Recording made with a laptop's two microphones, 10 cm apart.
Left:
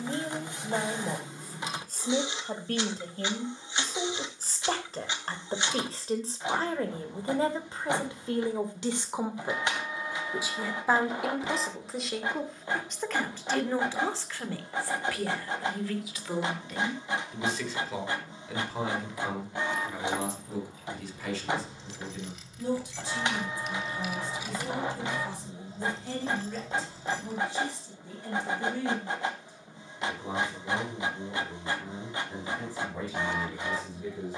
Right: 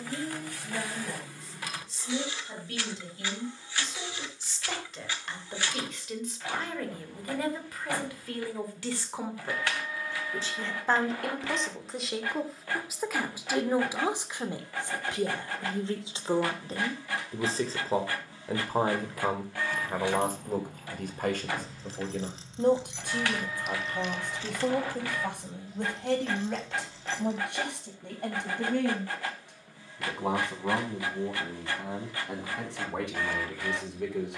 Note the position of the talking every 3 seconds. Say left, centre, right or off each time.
left, left, left, centre, centre, right, right, right, right, right, right, right.